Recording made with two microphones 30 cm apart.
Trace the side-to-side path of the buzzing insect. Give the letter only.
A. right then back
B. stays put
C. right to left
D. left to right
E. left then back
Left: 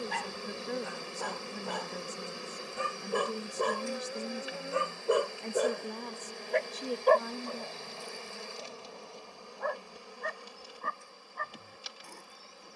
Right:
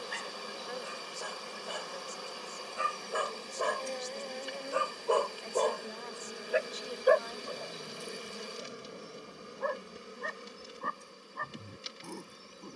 D.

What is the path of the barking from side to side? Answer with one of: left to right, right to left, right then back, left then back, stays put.
left to right.